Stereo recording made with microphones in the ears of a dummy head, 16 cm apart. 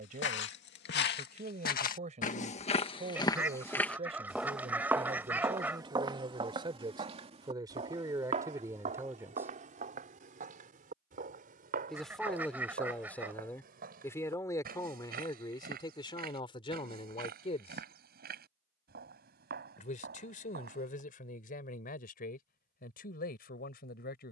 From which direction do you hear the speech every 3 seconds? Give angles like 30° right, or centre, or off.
40° right, 30° right, 20° right, 10° right, 10° left, 30° left, 50° left, 50° left.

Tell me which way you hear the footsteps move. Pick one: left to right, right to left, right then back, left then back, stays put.
left to right.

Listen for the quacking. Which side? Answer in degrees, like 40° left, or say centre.
10° right.